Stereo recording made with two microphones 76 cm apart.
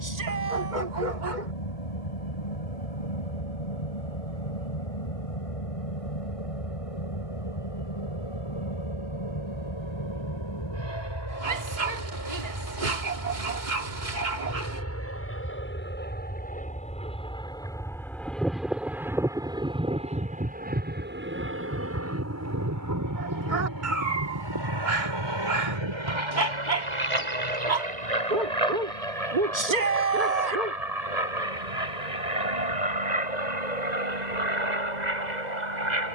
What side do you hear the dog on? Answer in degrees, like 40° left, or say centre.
70° right.